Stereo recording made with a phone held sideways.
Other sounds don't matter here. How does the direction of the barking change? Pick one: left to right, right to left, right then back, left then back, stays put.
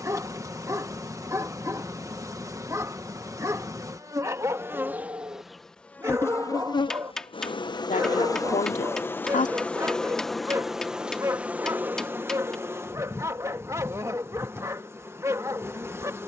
stays put.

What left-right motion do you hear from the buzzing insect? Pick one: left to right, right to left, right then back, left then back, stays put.
left then back.